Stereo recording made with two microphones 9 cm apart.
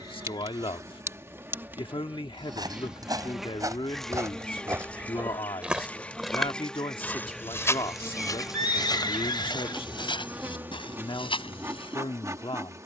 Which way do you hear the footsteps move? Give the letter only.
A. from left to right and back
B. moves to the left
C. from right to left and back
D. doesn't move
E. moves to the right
B.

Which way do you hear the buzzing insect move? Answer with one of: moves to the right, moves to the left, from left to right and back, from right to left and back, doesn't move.
from right to left and back.